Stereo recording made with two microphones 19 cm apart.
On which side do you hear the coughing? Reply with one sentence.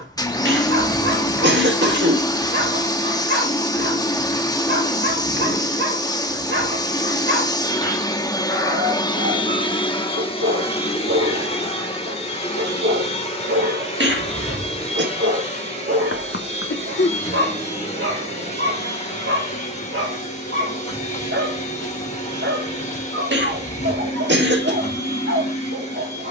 You can hear the coughing on the right.